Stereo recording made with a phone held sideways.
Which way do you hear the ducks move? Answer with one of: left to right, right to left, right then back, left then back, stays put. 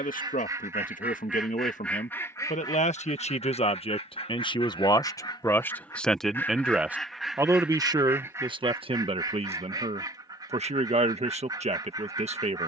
left then back.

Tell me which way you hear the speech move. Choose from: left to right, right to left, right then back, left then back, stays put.
left to right.